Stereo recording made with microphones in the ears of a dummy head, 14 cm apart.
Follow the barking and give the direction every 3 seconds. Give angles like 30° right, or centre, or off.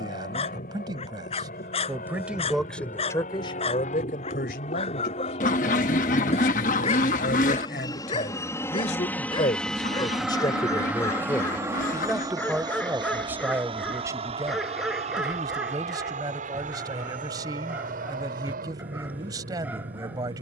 40° left, 40° left, 40° left, 20° left, centre, 10° right, 10° right.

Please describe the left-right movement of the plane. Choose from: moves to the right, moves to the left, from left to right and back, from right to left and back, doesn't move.
moves to the right.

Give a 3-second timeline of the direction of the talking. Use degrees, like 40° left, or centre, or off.
20° right, 60° left, 60° left, 30° left, 10° right, 20° right, 20° right.